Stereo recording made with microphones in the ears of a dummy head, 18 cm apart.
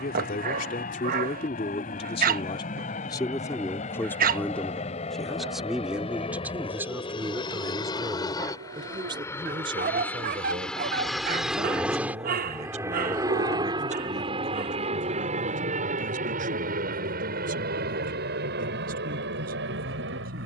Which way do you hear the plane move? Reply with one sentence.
You can hear the plane move to the right.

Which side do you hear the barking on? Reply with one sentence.
In this clip you hear the barking on the right.